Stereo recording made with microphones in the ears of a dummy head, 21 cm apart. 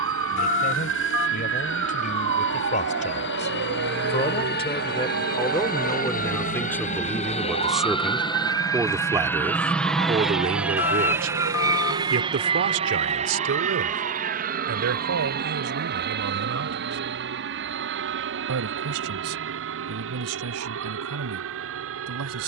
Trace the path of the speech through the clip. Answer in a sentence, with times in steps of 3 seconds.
You can hear the speech on the left from 0 s, in the centre from 6 s and on the right from 9 s.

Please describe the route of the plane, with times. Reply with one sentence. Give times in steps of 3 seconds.
In this clip you hear the plane on the left from 0 s, in the centre from 9 s and on the right from 12 s.